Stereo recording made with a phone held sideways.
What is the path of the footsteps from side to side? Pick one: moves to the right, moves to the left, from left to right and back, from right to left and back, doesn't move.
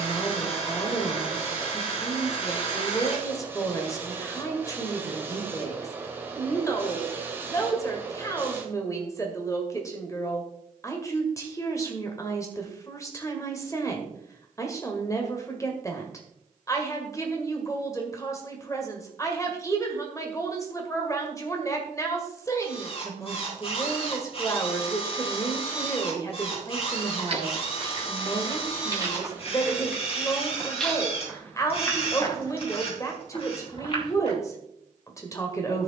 moves to the left.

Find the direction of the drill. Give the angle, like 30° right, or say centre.
40° left.